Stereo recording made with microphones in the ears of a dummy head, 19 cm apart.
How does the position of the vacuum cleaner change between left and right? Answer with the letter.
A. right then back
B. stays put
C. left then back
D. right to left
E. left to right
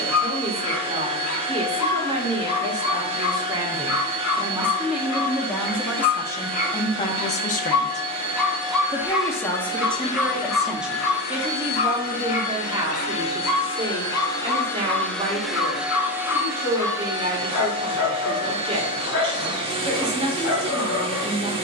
C.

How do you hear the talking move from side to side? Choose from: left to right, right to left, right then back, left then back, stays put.
left then back.